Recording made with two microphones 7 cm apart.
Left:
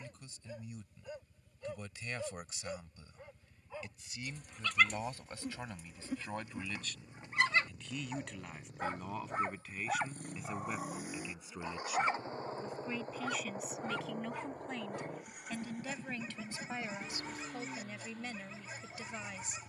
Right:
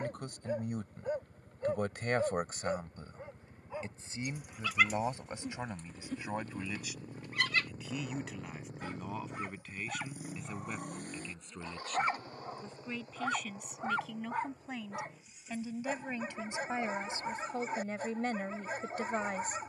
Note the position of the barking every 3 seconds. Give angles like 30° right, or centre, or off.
40° right, centre, 20° left, 20° left, 30° right, 50° right, 50° right.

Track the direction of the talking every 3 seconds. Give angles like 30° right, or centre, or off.
60° right, 30° right, 10° right, centre, centre, 20° right, 40° right.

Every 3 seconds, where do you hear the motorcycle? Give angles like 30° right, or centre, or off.
70° right, 60° right, 40° right, centre, 40° left, 60° left, 70° left.